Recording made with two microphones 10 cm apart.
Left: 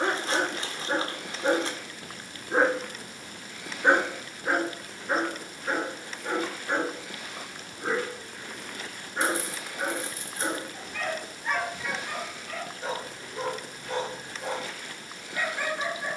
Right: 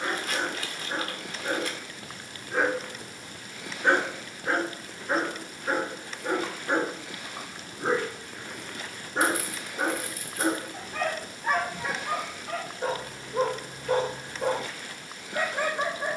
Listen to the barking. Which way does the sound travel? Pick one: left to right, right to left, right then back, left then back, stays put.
left to right.